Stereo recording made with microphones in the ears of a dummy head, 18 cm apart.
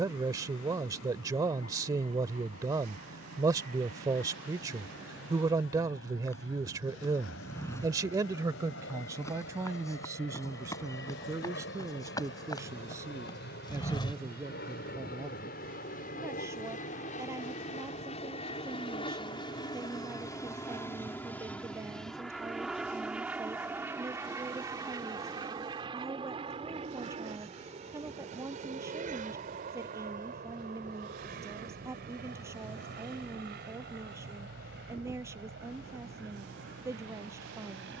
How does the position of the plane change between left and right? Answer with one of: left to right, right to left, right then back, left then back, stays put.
left to right.